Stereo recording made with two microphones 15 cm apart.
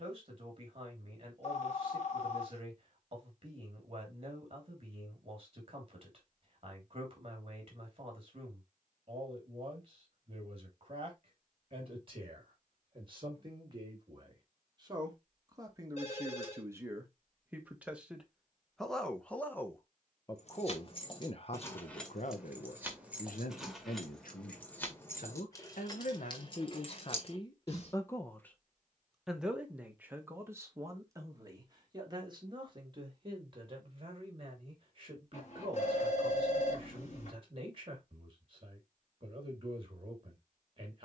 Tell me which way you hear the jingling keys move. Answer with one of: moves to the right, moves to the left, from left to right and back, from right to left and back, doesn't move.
from left to right and back.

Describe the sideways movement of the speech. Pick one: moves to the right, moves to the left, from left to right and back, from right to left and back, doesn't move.
from right to left and back.